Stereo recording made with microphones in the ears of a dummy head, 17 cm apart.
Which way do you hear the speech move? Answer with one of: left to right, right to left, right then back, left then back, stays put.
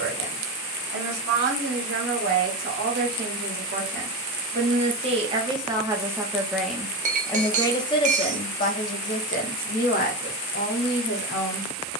right to left.